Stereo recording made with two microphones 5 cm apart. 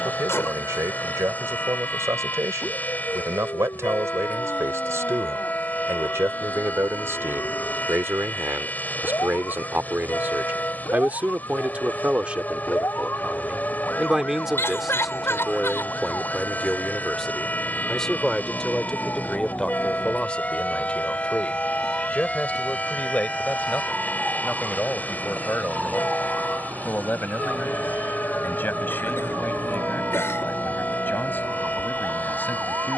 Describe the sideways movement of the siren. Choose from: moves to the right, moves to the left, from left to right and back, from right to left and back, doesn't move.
moves to the right.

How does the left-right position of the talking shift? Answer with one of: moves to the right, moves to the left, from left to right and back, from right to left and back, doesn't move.
moves to the left.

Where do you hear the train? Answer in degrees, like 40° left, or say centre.
30° left.